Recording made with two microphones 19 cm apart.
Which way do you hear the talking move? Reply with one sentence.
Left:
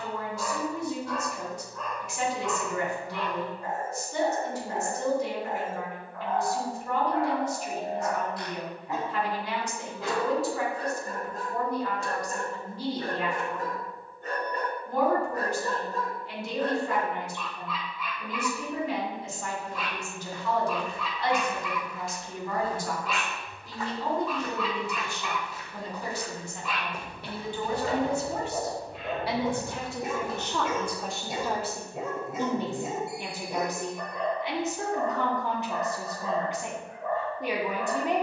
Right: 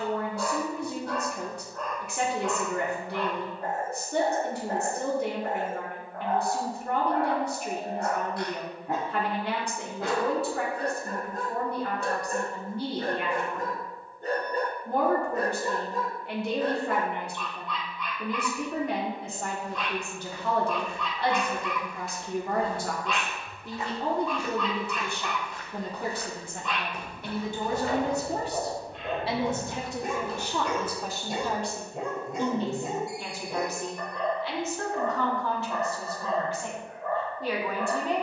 In this clip you hear the talking move to the left.